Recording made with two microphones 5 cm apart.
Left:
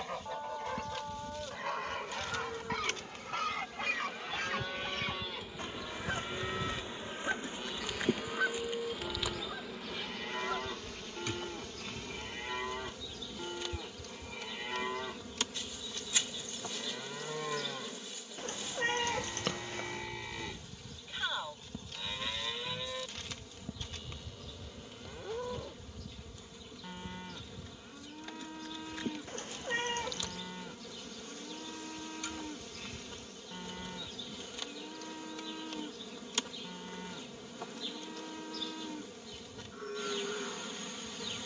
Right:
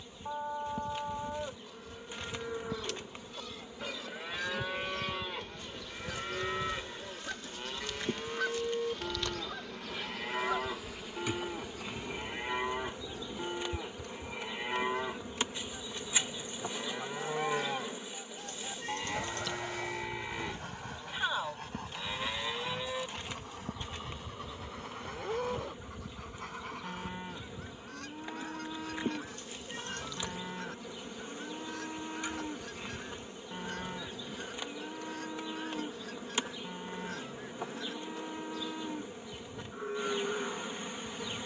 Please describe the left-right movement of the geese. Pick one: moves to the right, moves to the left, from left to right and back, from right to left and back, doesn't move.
moves to the right.